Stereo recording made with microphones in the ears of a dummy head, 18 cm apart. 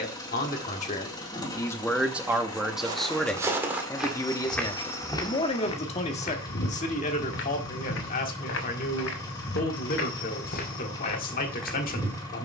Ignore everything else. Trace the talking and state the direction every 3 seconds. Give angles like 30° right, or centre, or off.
20° left, 20° left, 40° left, 40° left.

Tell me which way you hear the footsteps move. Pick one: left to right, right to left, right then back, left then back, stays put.
left then back.